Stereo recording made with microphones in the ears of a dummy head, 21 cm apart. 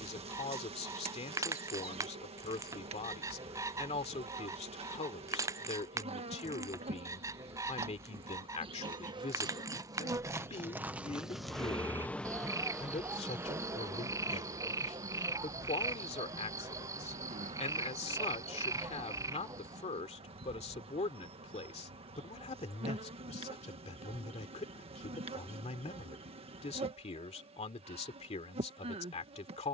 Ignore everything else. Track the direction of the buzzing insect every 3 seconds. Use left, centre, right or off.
right, right, right, centre, centre, right, right, right, right, right.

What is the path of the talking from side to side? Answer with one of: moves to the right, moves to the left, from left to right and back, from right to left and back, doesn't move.
doesn't move.